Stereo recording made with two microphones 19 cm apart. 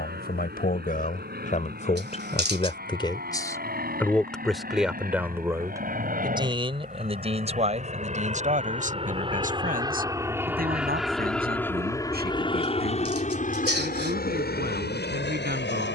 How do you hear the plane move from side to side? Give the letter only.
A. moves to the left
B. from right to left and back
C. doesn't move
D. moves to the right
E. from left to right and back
A.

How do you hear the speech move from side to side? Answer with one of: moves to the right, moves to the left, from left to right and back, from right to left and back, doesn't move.
moves to the right.